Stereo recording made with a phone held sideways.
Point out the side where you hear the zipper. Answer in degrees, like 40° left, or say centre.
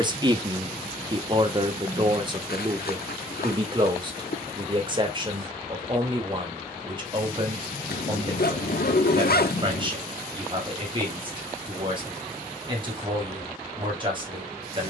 70° left.